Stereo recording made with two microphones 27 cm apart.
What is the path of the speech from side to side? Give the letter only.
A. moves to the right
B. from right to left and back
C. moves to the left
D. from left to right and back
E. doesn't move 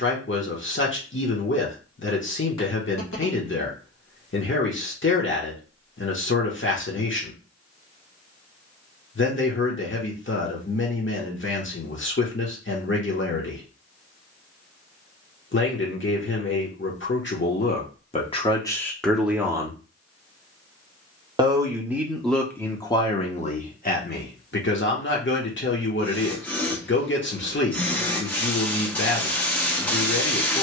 D.